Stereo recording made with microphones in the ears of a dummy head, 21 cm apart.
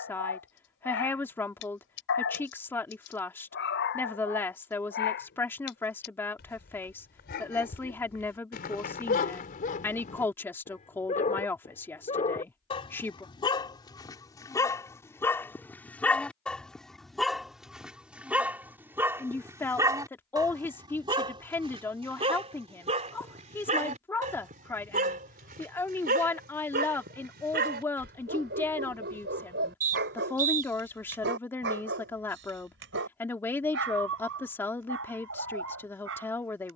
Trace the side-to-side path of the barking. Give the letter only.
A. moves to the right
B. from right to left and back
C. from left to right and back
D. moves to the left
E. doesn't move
A.